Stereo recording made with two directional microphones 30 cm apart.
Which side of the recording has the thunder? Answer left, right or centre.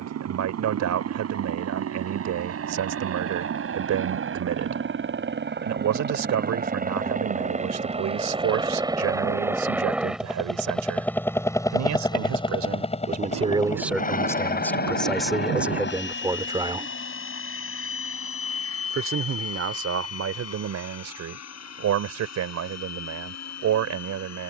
right.